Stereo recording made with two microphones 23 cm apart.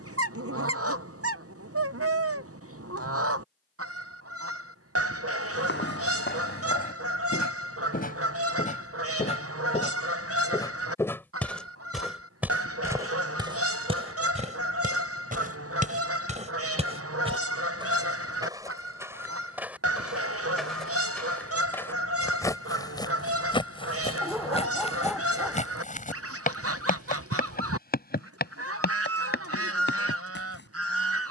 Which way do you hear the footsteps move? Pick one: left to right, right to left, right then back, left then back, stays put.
right then back.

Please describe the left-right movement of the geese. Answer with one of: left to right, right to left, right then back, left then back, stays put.
stays put.